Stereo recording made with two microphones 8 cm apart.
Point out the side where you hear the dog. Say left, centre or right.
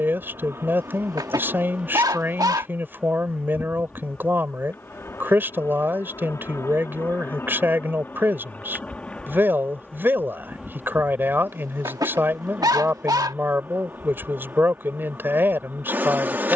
right.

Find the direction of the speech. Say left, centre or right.
right.